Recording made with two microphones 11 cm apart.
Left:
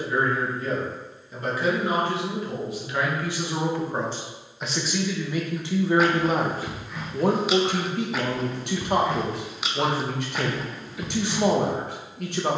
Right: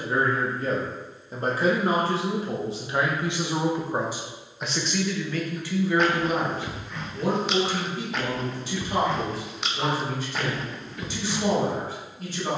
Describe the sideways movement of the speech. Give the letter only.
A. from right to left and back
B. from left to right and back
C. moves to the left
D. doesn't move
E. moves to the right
C.